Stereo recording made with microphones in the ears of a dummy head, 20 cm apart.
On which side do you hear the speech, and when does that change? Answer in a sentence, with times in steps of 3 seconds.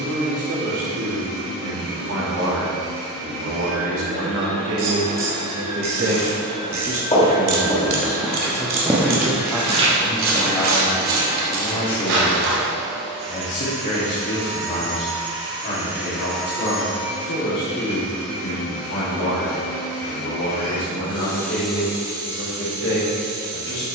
You can hear the speech on the right from 0 s, in the centre from 9 s and on the left from 12 s.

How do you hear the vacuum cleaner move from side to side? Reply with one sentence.
In this clip you hear the vacuum cleaner go left and come back.